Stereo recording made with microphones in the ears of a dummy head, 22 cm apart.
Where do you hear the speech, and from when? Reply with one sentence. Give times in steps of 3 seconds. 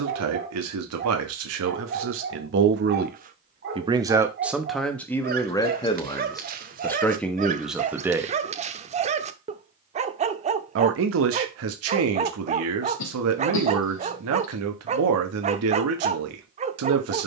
You can hear the speech on the right from 0 s, in the centre from 3 s and on the right from 9 s.